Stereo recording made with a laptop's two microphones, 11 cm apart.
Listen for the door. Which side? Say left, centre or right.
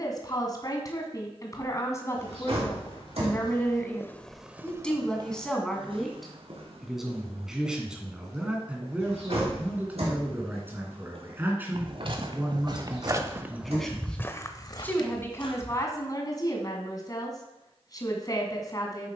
right.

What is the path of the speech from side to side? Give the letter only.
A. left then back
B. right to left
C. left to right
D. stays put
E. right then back
E.